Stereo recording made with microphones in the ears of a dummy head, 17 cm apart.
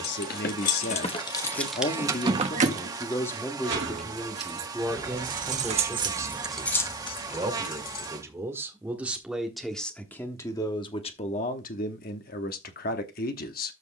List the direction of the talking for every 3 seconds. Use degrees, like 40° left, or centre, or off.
40° left, centre, 20° right, 20° left, 50° left.